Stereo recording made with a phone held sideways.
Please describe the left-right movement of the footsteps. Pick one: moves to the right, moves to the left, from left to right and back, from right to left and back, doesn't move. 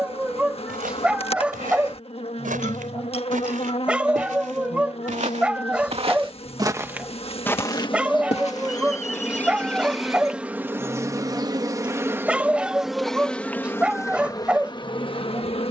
moves to the left.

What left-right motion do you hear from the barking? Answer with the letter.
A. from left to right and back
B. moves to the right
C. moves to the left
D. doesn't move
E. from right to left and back
D.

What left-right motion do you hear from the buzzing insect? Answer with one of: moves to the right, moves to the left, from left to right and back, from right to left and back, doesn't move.
from left to right and back.